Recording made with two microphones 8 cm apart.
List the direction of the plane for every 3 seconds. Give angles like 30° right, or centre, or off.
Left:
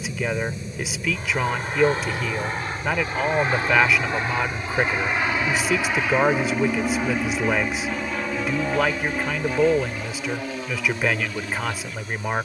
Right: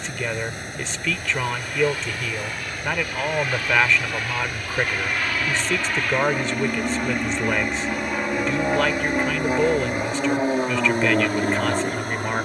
40° left, 30° left, centre, 30° right.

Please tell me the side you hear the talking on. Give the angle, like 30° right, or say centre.
10° left.